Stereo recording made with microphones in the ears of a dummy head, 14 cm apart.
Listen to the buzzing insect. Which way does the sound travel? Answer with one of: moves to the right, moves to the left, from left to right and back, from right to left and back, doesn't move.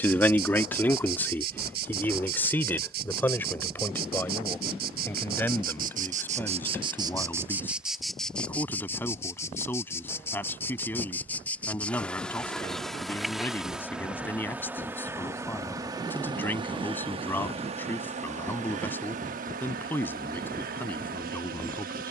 from right to left and back.